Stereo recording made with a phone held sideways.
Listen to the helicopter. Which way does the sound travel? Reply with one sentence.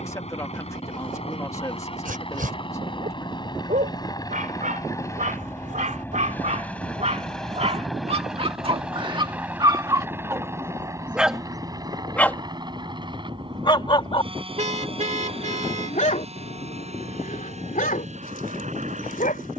In this clip you hear the helicopter travel towards the right.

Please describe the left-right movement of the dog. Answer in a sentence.
You can hear the dog travel towards the left.